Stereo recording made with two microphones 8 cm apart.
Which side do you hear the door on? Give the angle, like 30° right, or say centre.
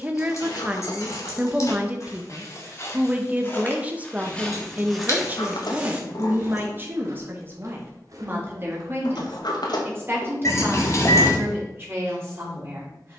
70° left.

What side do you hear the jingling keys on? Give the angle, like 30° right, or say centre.
40° left.